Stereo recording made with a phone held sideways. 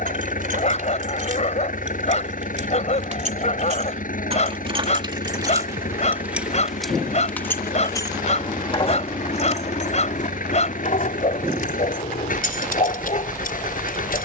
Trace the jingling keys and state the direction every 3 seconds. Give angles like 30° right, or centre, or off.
60° right, 40° right, 20° left, 50° left, 70° left.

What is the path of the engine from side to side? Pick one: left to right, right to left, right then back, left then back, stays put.
stays put.